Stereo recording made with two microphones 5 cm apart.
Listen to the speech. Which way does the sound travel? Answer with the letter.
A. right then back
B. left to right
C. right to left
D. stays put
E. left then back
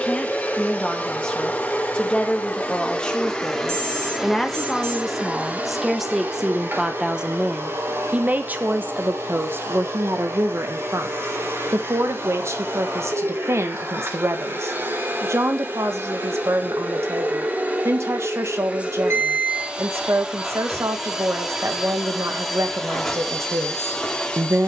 B.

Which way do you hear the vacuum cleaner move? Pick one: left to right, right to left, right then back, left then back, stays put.
right then back.